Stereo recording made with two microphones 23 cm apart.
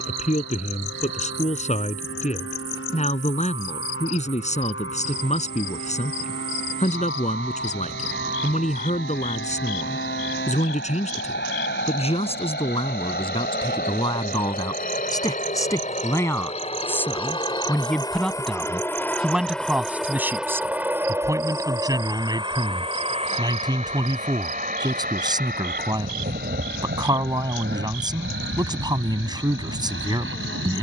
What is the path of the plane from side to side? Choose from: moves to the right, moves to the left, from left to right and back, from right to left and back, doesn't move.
moves to the right.